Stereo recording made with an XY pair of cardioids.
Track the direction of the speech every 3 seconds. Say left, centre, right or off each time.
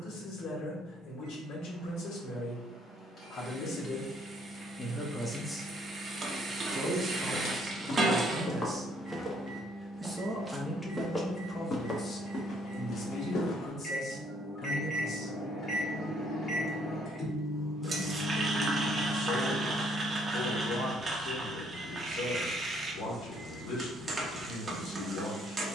left, left, right, centre, left, left, left, left, left.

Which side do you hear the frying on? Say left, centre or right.
right.